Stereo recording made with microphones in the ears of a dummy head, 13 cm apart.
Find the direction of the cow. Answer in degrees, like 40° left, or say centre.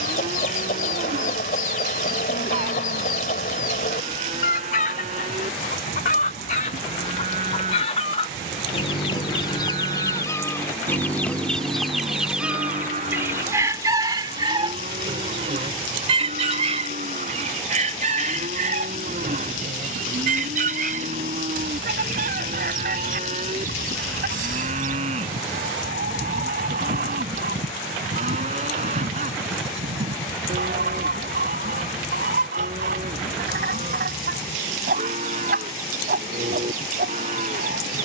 50° right.